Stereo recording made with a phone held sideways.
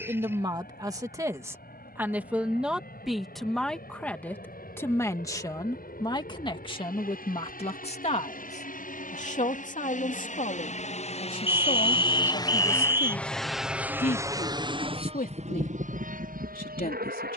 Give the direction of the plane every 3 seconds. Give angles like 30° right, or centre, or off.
80° left, 70° left, 70° left, 50° left, centre, 50° right.